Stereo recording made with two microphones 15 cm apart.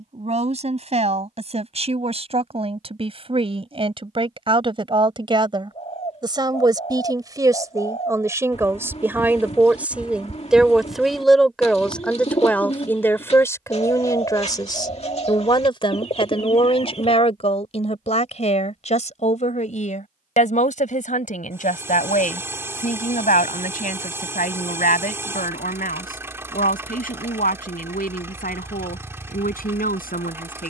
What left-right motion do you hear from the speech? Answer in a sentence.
In this clip you hear the speech move to the left.